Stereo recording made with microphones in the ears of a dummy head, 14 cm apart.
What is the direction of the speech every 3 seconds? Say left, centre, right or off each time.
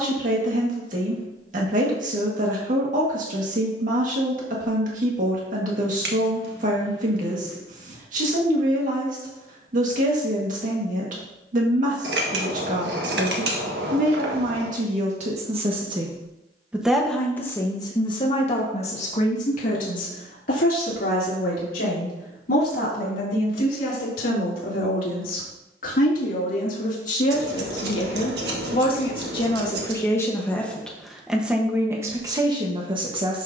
right, right, right, right, right, centre, left, left, left, left, centre.